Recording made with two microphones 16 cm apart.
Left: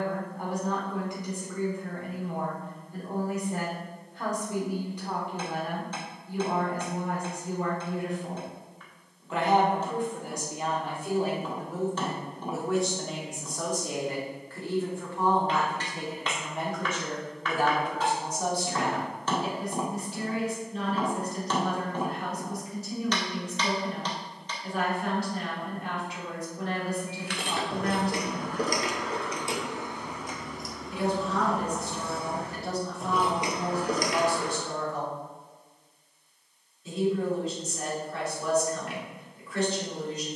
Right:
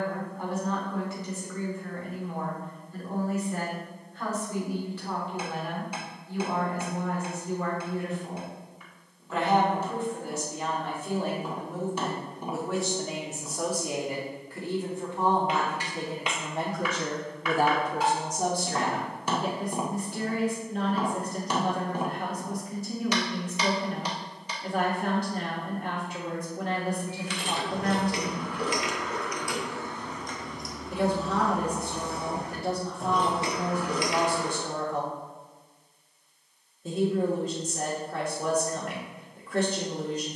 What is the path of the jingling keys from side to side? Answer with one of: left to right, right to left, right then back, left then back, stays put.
right then back.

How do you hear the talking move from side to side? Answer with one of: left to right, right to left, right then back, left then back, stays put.
left to right.